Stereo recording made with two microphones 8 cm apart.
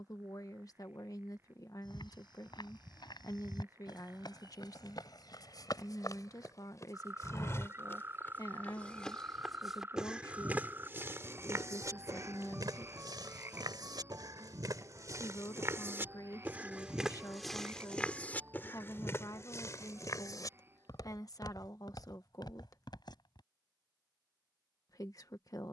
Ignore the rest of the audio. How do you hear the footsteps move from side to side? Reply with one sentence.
In this clip you hear the footsteps move from left to right and back again.